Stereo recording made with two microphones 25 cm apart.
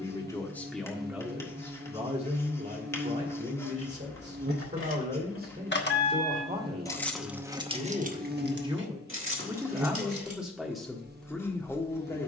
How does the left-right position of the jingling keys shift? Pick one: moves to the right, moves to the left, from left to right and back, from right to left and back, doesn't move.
moves to the right.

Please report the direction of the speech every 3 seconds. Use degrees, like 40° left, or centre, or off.
10° right, 40° right, 30° right, centre.